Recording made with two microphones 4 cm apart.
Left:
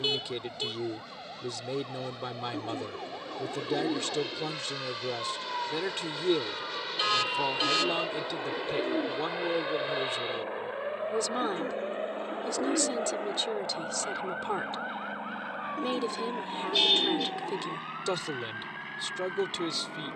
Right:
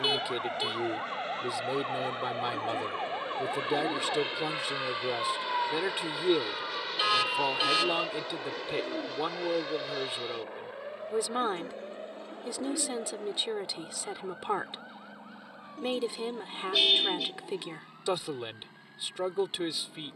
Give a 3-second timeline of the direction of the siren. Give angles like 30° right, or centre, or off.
40° right, 20° right, centre, 20° left, 40° left, 50° left, 60° left.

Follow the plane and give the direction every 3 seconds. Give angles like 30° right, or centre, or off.
50° right, 30° right, centre, 30° left, 40° left, 50° left, 60° left.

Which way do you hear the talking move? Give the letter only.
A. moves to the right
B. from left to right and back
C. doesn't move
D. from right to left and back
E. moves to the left
C.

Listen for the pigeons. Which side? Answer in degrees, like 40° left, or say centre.
50° left.